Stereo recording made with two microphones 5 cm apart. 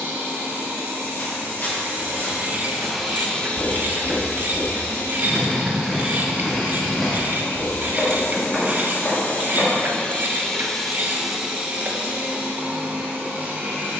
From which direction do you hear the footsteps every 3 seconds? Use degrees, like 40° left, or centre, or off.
50° left, 20° left, 10° left, 40° left, off.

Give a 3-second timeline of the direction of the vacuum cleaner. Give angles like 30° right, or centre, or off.
40° right, 60° left, 70° left, 10° left, 40° right.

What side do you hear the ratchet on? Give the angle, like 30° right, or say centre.
40° right.